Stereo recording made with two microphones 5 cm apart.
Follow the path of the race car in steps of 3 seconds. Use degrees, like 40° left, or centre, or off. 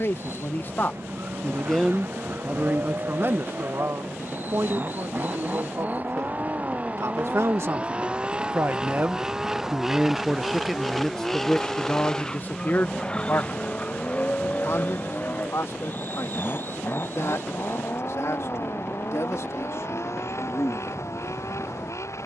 50° right, 40° right, 30° right, centre, 20° left, 40° left, 50° left, 60° left.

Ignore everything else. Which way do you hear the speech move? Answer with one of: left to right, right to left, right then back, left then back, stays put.
right then back.